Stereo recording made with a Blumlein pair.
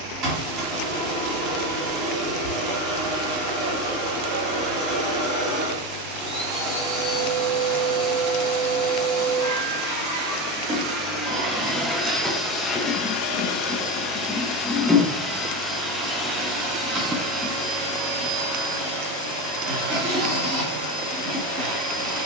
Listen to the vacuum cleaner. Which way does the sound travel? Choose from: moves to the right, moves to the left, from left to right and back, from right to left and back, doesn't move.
from right to left and back.